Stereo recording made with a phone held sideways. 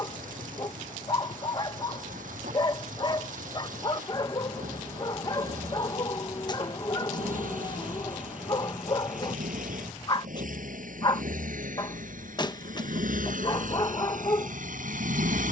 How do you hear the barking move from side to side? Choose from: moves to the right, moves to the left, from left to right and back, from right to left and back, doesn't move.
doesn't move.